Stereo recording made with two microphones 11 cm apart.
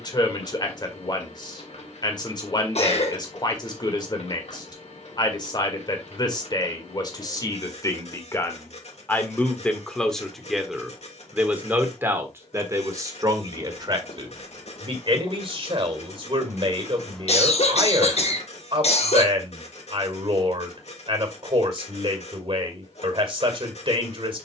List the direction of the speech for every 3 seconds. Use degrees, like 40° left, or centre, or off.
40° left, 40° left, 30° left, centre, 30° right, 50° right, 50° right, 50° right.